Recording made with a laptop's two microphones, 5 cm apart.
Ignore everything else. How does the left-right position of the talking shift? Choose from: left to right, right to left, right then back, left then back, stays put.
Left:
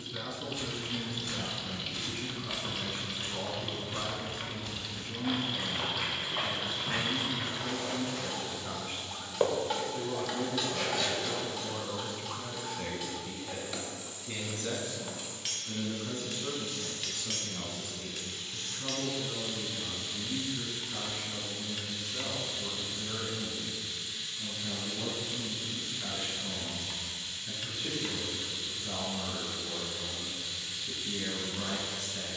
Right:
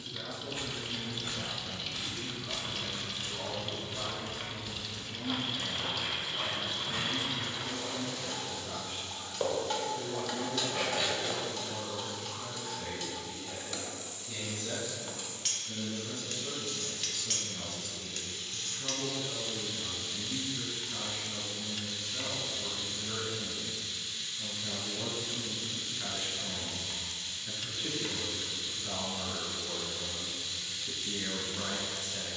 left to right.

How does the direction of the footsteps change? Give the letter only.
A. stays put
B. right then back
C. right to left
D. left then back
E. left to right
D.